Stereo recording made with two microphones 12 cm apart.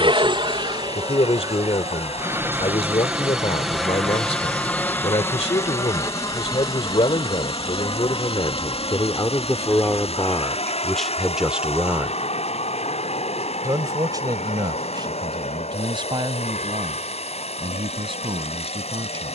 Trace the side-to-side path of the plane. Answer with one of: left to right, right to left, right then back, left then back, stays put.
right to left.